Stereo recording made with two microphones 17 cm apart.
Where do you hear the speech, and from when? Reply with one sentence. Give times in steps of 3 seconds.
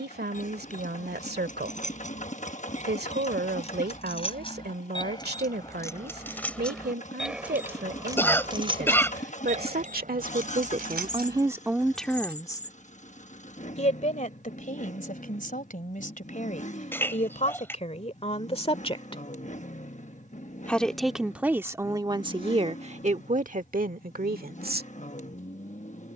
In this clip you hear the speech on the right from 0 s, on the left from 12 s and on the right from 21 s.